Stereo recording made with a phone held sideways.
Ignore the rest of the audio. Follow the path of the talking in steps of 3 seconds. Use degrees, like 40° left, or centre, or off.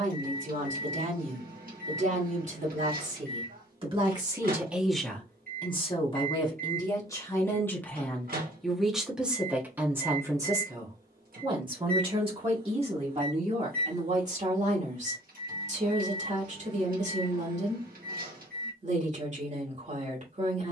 50° right, 10° right, 20° left, 20° right, 40° right, 50° right, 50° right.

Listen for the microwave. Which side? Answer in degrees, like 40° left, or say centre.
60° right.